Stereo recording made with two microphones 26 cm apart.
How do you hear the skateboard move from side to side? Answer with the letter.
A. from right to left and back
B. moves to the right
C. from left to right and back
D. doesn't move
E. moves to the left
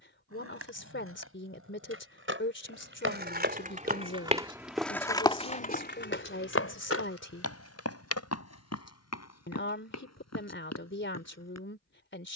E.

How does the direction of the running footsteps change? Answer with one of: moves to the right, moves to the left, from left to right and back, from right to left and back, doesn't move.
moves to the left.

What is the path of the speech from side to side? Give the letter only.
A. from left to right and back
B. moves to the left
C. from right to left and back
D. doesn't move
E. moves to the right
D.